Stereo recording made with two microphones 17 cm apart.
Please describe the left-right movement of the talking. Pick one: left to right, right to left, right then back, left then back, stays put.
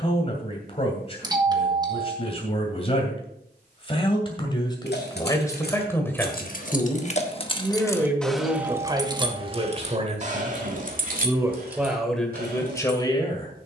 right then back.